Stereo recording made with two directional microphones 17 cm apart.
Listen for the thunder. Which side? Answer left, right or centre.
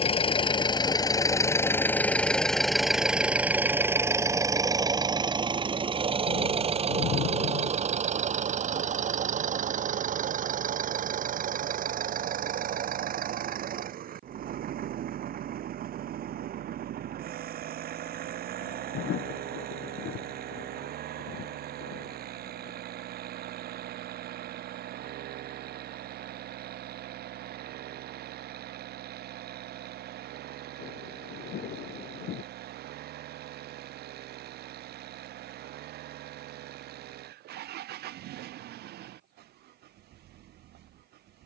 left.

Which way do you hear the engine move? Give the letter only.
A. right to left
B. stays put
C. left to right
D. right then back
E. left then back
C.